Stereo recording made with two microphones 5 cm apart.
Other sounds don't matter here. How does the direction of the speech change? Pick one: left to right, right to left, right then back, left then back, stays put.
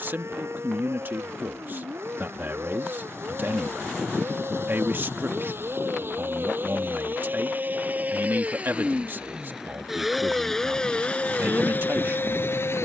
stays put.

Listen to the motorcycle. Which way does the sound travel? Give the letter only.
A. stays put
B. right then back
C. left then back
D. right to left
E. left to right
D.